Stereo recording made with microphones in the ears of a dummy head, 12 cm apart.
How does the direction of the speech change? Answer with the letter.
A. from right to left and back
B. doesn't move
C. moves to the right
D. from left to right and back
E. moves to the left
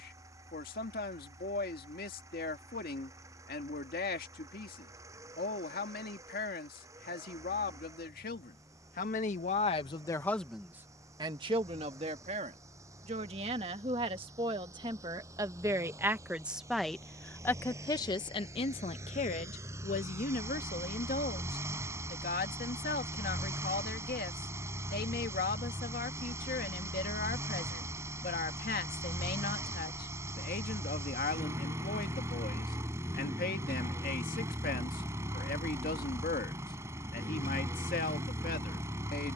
D.